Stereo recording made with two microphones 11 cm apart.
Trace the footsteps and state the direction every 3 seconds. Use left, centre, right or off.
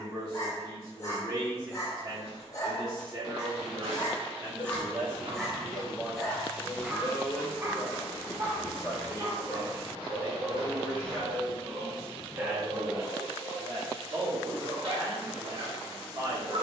right, right, centre, right, off, off.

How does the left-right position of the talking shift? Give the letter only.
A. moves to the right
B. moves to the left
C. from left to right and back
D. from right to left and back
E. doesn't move
D.